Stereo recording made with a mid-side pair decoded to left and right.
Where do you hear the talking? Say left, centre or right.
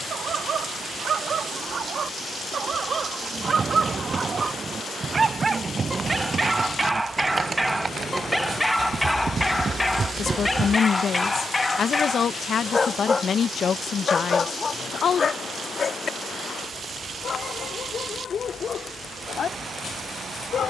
left.